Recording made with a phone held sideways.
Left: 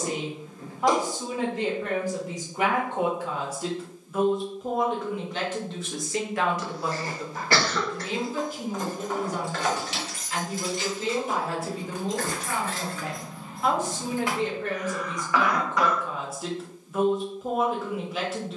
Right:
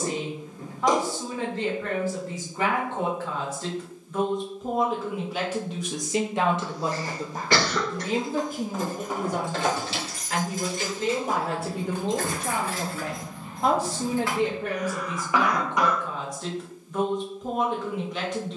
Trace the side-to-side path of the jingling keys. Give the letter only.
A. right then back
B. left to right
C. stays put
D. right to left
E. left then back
A.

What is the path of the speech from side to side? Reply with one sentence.
You can hear the speech move from left to right and back again.